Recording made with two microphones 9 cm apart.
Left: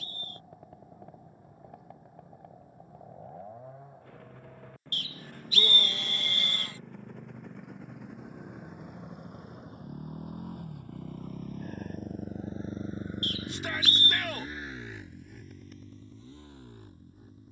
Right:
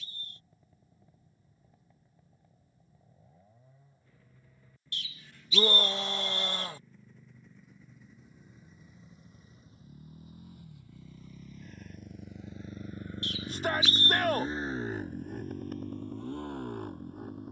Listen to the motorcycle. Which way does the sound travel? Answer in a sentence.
In this clip you hear the motorcycle travel towards the right.